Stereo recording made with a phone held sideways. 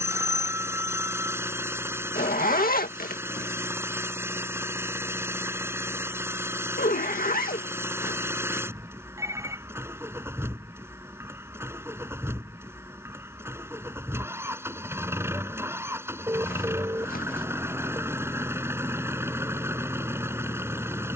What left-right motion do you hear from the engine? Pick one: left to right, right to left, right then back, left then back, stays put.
stays put.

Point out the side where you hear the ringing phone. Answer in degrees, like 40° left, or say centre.
20° right.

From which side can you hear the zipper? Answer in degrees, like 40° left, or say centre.
80° left.